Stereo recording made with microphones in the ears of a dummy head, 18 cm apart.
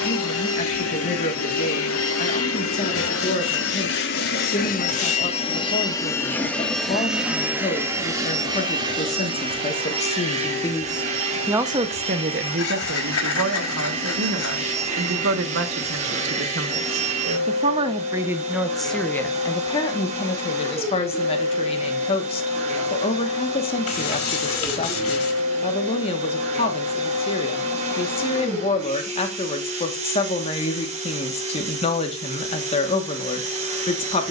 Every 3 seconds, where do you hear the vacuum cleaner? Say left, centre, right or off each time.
left, left, centre, right, right, right, right, right, right, right, right, right.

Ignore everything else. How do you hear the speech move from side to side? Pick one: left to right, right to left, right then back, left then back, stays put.
right then back.